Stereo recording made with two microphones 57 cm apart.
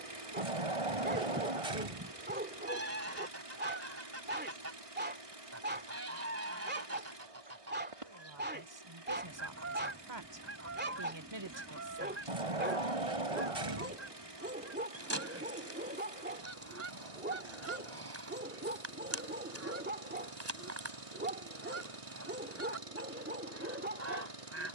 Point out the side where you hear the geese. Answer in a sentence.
In this clip you hear the geese on the right.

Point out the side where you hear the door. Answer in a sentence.
In this clip you hear the door on the right.